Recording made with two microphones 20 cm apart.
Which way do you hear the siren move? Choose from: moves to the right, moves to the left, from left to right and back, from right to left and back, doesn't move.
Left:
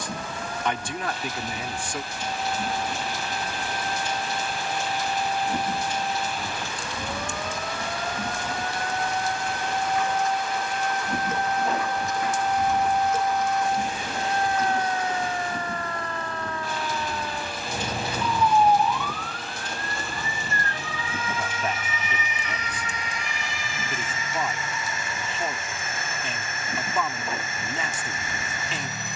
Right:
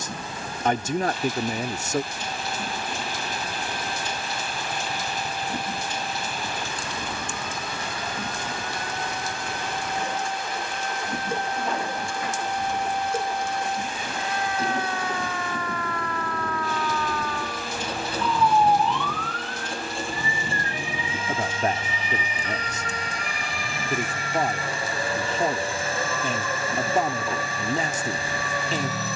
moves to the right.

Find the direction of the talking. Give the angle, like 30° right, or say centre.
40° right.